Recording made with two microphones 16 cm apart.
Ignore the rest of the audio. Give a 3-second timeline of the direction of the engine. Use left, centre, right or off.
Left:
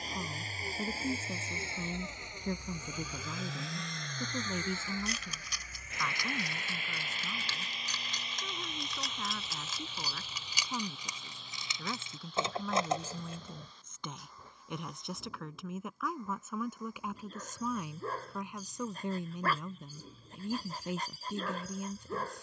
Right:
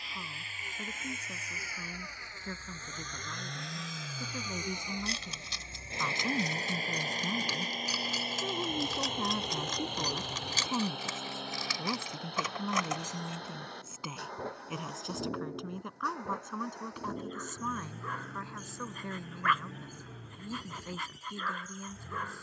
left, centre, right, right, right, right, right, right.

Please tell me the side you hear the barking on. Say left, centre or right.
left.